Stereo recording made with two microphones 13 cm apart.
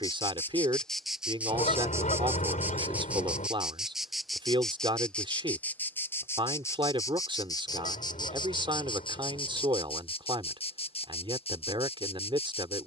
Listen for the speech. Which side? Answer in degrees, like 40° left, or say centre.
40° right.